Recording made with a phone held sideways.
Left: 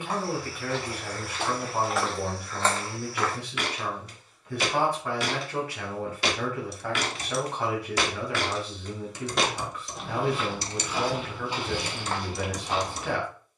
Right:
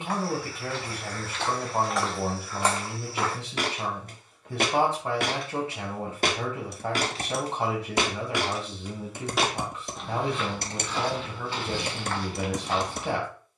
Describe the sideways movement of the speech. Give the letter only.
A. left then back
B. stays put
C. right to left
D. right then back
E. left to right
B.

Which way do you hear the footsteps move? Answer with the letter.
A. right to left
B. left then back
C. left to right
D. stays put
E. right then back
E.